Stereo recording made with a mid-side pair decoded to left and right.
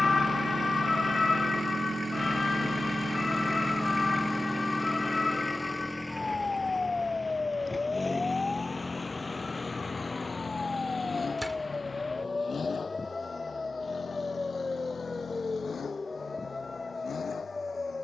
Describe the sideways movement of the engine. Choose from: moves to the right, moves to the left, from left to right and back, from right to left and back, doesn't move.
moves to the left.